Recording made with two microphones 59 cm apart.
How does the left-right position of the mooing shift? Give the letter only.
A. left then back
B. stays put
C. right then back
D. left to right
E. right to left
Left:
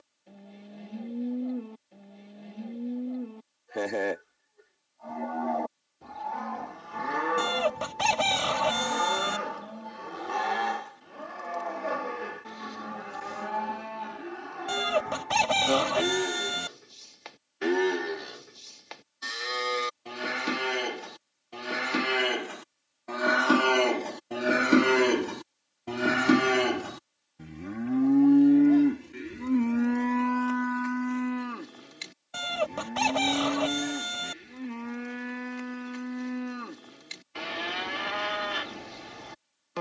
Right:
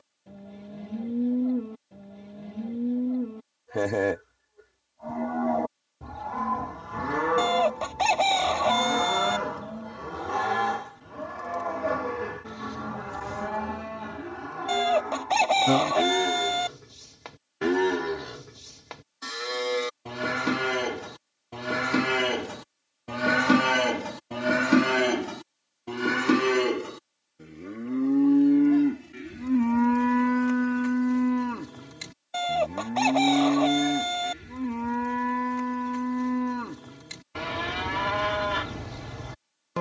A.